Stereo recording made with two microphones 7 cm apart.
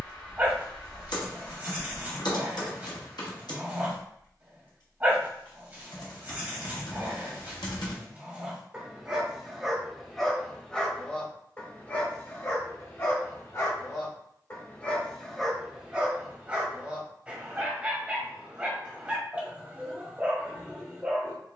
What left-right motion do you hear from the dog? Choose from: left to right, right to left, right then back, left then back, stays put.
left then back.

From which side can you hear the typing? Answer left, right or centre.
left.